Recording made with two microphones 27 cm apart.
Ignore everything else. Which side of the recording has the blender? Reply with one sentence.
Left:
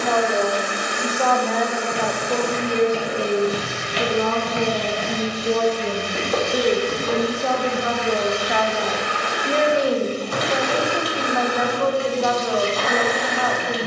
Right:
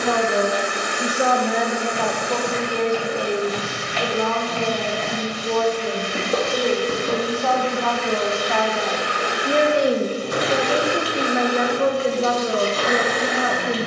In this clip you hear the blender on the right.